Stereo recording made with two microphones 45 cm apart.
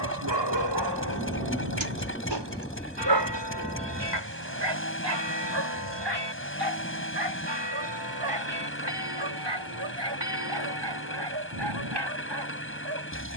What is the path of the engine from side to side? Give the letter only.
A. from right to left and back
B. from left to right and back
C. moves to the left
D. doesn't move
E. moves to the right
D.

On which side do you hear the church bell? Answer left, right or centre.
right.